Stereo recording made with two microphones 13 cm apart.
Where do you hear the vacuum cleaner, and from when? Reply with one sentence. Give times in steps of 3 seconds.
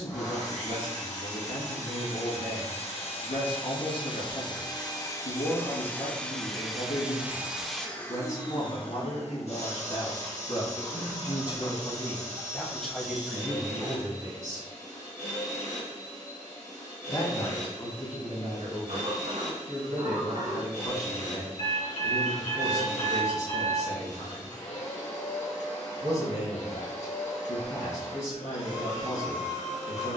You can hear the vacuum cleaner on the left from 0 s, in the centre from 6 s and on the left from 9 s.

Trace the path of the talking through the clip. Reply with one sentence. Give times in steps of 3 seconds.
You can hear the talking on the left from 0 s, in the centre from 12 s and on the left from 15 s.